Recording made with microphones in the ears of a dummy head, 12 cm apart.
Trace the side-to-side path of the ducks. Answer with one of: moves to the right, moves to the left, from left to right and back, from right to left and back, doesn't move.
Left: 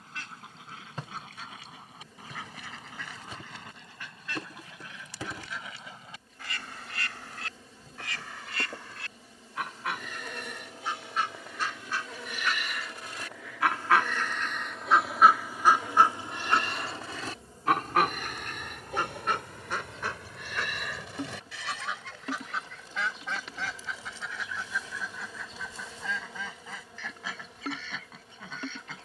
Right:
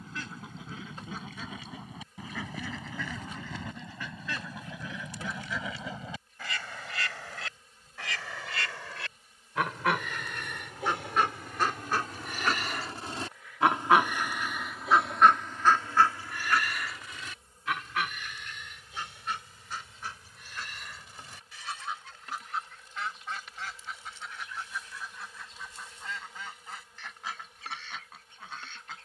moves to the left.